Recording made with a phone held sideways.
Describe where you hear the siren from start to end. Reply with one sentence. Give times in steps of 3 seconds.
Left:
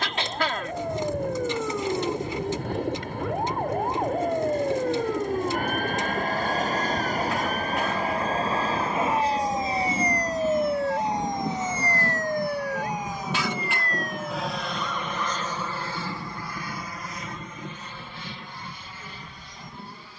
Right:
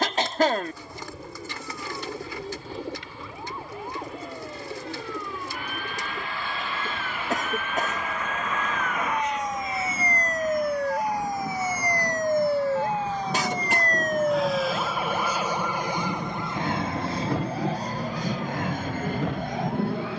In this clip you hear the siren on the left from 0 s, in the centre from 9 s and on the right from 12 s.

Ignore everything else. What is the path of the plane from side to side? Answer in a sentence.
In this clip you hear the plane go from the left side to the right.